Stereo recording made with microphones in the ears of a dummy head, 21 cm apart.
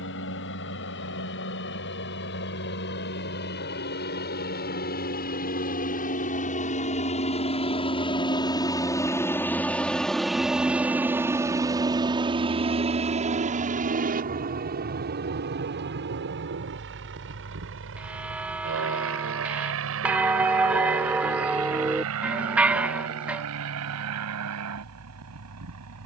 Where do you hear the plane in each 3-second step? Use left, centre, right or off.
left, left, left, centre, right, right, right, right, right.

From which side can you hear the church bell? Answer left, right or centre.
centre.